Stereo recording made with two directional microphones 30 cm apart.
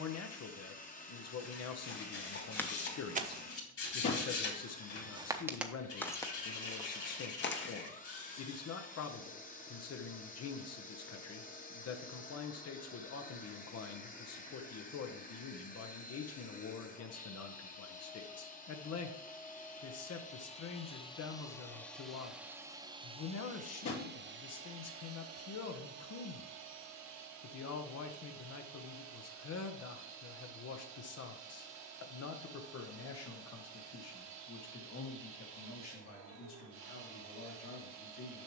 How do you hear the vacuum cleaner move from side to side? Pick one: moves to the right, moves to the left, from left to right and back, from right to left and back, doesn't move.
moves to the right.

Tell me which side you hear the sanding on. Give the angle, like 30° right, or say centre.
50° left.